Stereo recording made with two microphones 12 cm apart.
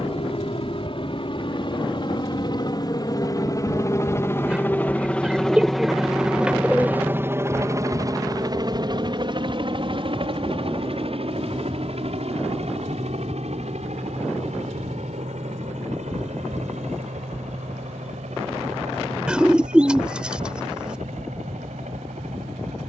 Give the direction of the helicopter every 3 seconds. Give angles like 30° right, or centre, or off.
50° left, 20° left, 20° right, 50° right, 60° right, 70° right, 80° right, 80° right.